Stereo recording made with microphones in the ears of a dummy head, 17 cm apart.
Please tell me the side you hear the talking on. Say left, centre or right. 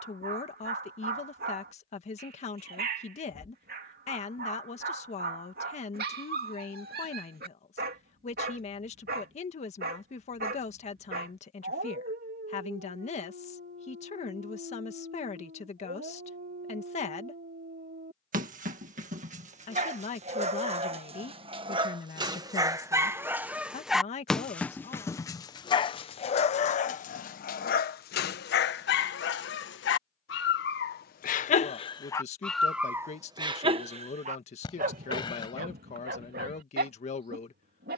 left.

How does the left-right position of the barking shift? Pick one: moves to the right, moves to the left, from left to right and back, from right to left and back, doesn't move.
from right to left and back.